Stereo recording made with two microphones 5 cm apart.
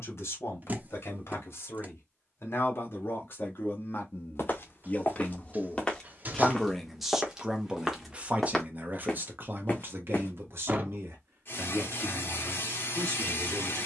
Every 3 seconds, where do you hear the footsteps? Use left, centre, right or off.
off, left, centre, left, off.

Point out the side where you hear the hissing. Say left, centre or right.
left.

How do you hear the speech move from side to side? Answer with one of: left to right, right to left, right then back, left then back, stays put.
left to right.